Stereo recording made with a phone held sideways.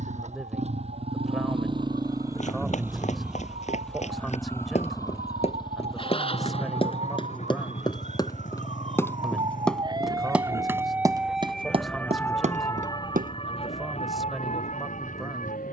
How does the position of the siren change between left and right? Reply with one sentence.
You can hear the siren move to the left.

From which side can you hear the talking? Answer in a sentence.
You can hear the talking in the centre.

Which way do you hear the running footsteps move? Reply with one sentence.
You can hear the running footsteps travel towards the right.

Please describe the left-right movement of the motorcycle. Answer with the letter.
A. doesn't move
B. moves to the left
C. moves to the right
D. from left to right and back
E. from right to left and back
B.